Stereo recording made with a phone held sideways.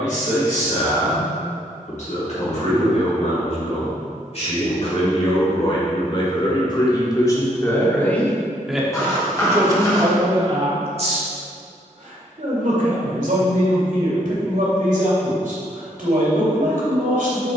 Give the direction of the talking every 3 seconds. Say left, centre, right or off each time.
left, left, left, right, right, right.